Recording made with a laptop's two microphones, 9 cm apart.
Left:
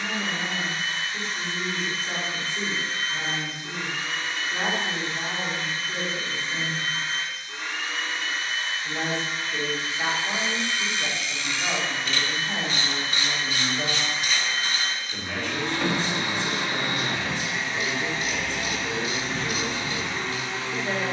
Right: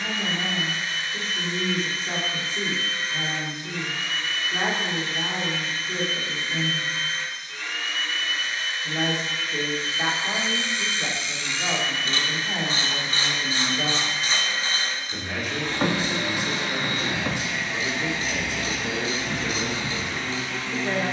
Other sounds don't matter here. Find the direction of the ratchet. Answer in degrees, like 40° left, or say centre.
30° right.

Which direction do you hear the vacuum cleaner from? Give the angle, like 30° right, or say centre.
30° left.